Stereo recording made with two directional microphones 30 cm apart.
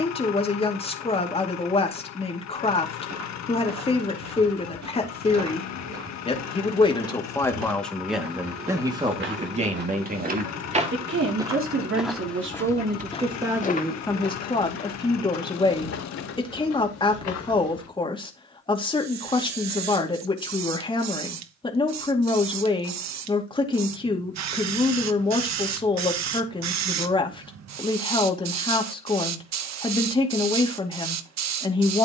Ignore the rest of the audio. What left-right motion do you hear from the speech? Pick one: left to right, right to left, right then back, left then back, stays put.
right then back.